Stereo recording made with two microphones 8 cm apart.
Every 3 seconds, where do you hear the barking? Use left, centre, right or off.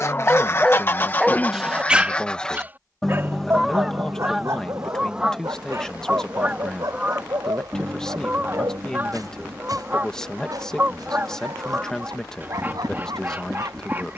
centre, right, right, right, right.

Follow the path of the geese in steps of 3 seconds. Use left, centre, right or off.
left, centre, right, right, right.